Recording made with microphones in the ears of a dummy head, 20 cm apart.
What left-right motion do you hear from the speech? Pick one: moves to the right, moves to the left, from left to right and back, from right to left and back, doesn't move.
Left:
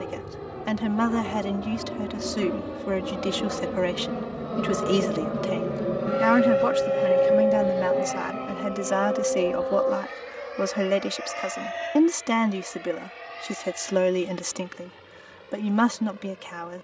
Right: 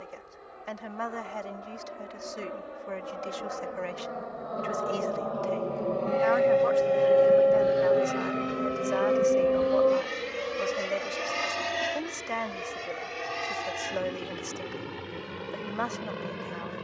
doesn't move.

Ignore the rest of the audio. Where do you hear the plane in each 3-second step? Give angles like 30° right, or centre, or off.
60° left, 40° left, 10° right, 40° right, 50° right, 60° right.